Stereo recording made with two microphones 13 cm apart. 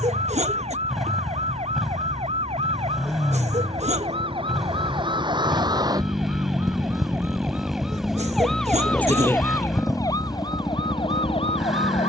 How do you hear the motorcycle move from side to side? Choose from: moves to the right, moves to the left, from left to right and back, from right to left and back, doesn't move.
doesn't move.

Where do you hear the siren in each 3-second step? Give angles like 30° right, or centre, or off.
60° right, 40° right, 10° right, 30° left.